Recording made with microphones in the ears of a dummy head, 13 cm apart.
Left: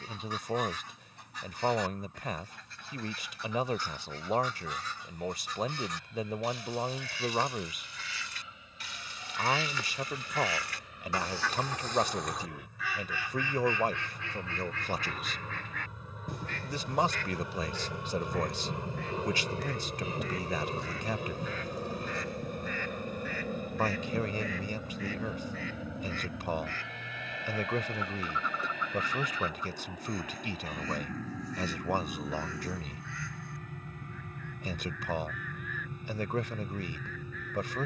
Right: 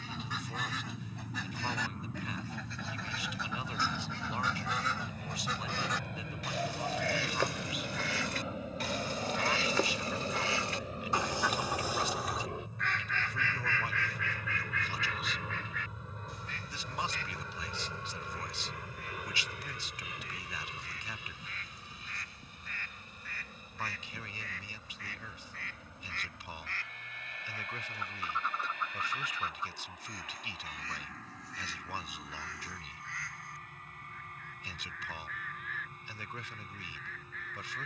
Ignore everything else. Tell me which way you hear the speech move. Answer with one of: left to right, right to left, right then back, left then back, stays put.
stays put.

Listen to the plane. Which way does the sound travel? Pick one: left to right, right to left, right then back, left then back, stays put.
right to left.